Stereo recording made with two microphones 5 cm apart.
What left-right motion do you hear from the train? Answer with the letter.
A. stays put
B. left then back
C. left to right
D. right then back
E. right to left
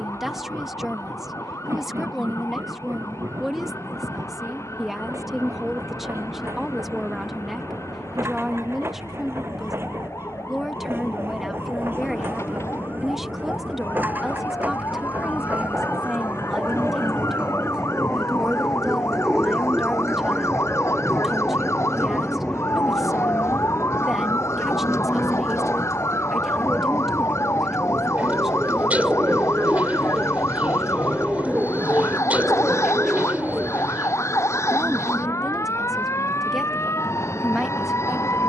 E.